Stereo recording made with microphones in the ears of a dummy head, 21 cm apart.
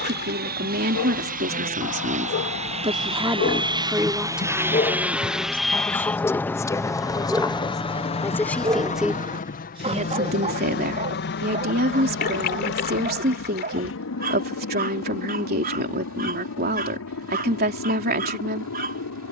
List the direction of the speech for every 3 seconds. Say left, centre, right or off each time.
right, centre, centre, right, right, right, right.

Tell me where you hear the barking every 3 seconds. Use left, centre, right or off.
left, left, centre, right, right, right, right.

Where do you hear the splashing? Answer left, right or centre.
left.